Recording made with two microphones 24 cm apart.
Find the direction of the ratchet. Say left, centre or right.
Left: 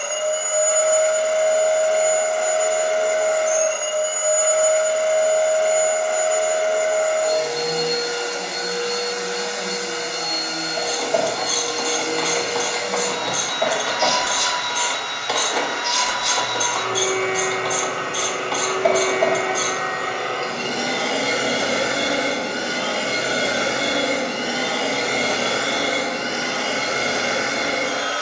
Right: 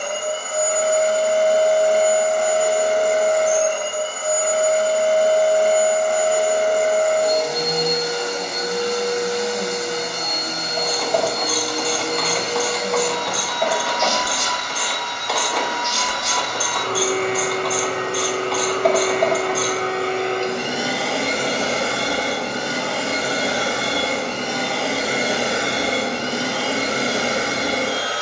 centre.